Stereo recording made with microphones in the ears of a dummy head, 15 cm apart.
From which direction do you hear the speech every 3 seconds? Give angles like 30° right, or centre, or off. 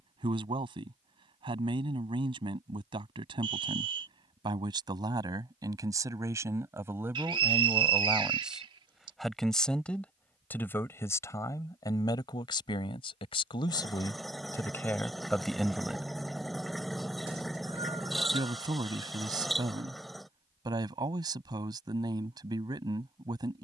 30° right, 30° right, 10° right, 10° left, 30° left, centre, 20° right, 20° right.